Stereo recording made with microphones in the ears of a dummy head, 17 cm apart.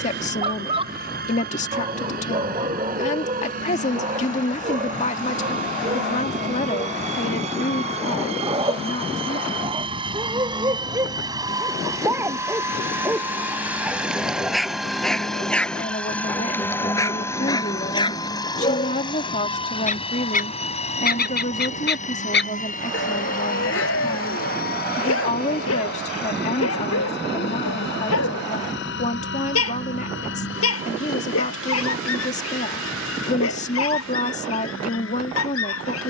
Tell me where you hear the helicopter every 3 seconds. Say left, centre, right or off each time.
right, right, right, right, centre, centre, left, left, left, left, left, left.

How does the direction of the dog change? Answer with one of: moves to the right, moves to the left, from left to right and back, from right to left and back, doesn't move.
moves to the left.